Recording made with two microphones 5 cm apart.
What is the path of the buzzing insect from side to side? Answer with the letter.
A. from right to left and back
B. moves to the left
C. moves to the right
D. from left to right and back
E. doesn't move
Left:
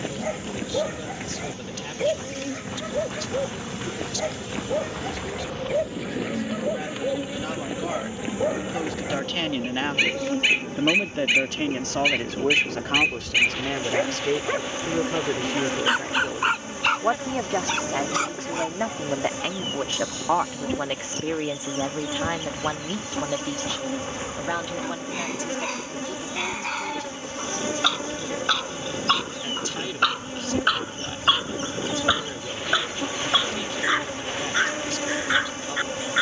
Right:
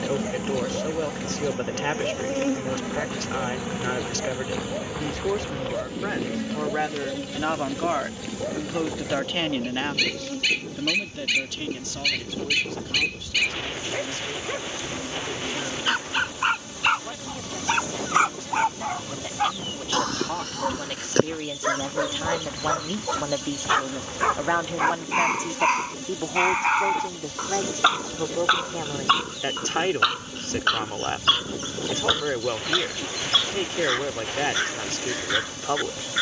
B.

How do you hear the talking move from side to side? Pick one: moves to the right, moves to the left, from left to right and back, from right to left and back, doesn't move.
from right to left and back.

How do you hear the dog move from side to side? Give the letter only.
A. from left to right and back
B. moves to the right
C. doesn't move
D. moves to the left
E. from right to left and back
A.